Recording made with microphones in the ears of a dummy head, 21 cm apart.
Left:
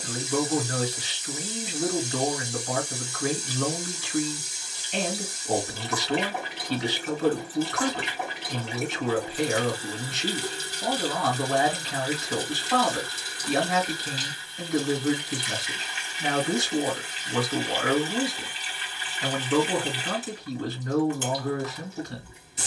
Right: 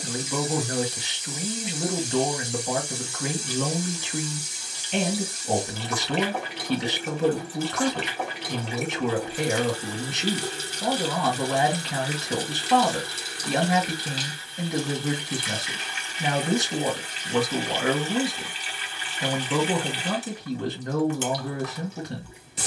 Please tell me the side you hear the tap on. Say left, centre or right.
right.